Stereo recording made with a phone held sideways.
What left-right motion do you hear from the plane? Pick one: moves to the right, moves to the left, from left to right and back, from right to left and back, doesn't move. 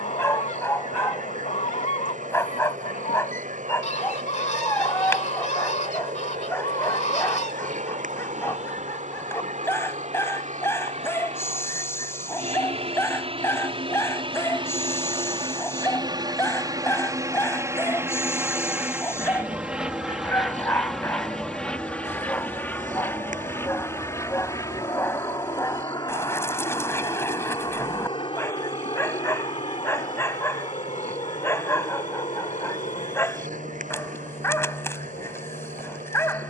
moves to the left.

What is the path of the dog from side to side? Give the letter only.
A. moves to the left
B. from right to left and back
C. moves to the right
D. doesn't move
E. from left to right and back
D.